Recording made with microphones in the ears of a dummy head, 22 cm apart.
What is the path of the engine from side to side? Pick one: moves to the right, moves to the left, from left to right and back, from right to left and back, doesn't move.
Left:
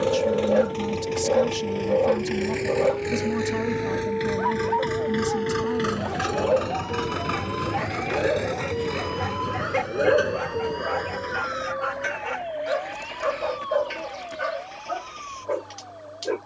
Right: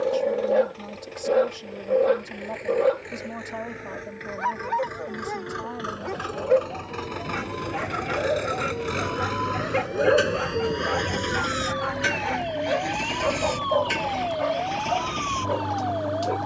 moves to the right.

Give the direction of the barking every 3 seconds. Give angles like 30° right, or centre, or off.
10° right, 40° right, 20° right, centre, 20° left, 30° left.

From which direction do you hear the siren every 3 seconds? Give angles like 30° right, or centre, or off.
80° left, 80° left, 60° left, 10° right, 60° right, 70° right.